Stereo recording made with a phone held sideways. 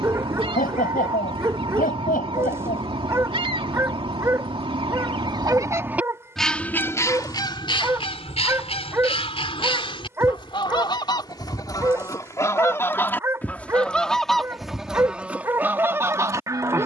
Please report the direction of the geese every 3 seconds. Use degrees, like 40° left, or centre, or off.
30° right, 30° right, 30° left, 30° left, 10° left, 10° right.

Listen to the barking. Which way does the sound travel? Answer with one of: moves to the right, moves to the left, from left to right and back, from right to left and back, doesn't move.
doesn't move.